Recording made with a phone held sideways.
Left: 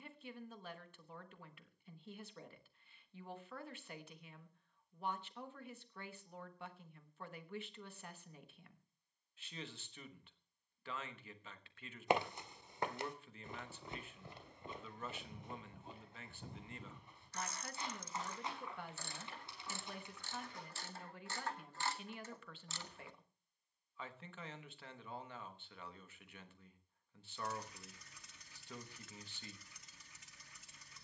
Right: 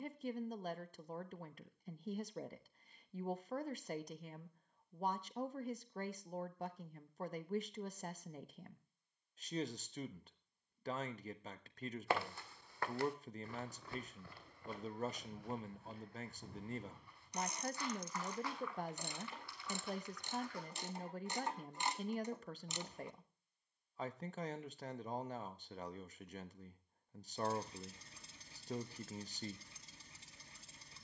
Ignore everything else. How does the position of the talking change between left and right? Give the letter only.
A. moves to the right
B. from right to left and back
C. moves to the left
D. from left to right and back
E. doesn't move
E.